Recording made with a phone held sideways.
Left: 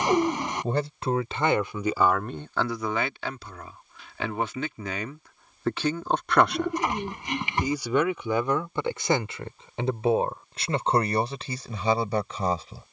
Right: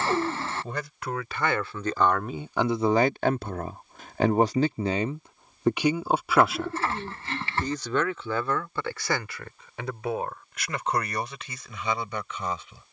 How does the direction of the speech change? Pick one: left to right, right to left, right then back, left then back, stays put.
right then back.